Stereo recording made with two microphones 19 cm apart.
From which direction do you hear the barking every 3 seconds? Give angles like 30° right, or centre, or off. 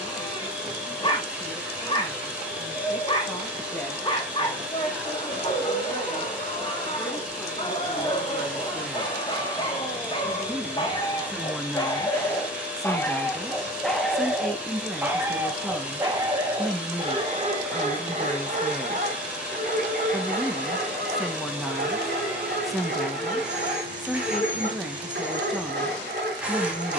30° left, 30° left, 30° left, 30° left, 10° left, 20° right, 50° right, 60° right, 60° right.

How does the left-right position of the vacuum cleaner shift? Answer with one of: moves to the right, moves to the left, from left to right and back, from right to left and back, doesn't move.
doesn't move.